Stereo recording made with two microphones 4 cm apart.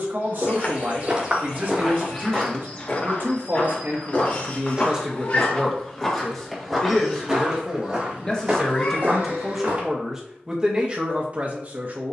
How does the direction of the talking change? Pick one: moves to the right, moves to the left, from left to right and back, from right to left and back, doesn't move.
from right to left and back.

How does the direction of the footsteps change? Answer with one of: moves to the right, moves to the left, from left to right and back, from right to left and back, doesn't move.
from right to left and back.